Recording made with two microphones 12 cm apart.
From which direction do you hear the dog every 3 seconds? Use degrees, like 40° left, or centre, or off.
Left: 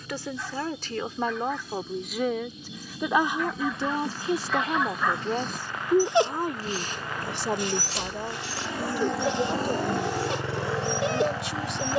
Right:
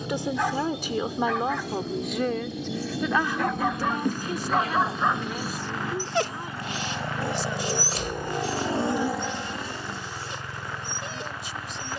70° right, 40° right, 40° left, 70° left.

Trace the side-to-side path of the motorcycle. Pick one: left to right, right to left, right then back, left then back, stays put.
right to left.